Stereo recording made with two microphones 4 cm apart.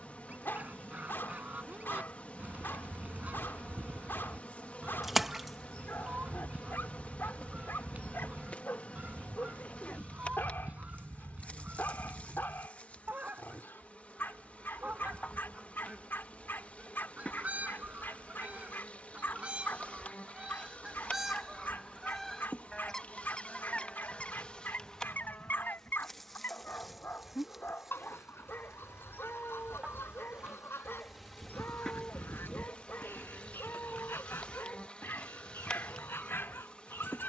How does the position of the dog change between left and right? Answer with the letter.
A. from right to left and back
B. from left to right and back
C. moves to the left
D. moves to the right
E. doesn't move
E.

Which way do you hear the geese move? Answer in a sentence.
In this clip you hear the geese go from the right side to the left.